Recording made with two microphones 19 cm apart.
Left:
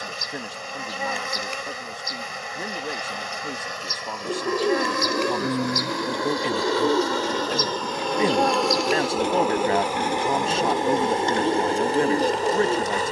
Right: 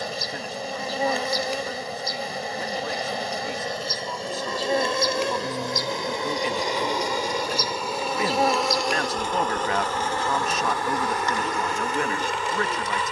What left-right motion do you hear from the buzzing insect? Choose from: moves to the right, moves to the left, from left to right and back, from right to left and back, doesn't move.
moves to the left.